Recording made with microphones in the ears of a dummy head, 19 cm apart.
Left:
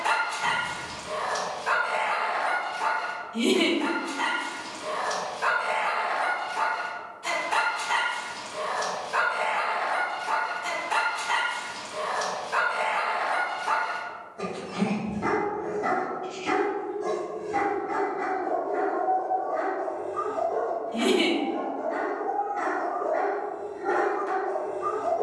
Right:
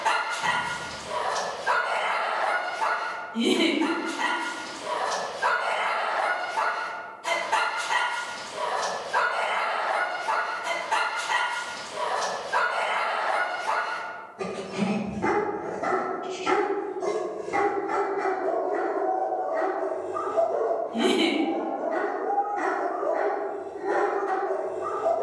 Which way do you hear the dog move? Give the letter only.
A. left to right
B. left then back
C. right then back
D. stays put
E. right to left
C.